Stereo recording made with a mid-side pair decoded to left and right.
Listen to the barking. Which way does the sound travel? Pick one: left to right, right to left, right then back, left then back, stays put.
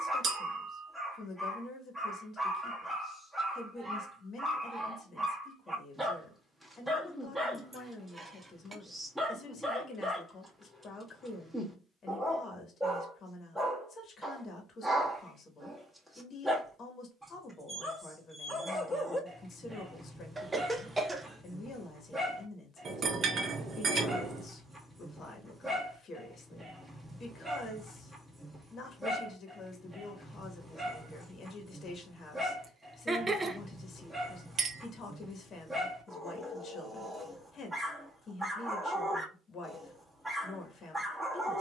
stays put.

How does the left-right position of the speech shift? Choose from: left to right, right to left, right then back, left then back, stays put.
stays put.